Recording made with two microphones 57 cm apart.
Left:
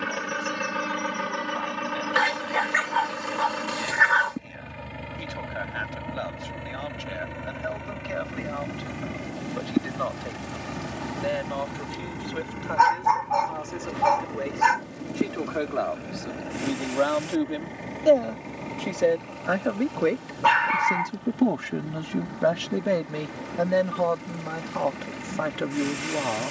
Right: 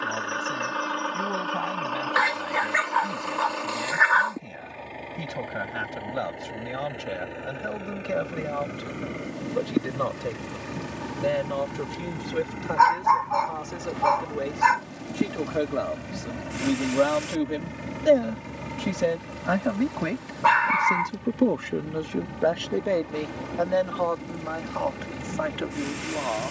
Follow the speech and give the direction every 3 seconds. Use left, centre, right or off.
right, right, right, right, right, right, right, left, left.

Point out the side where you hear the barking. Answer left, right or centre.
left.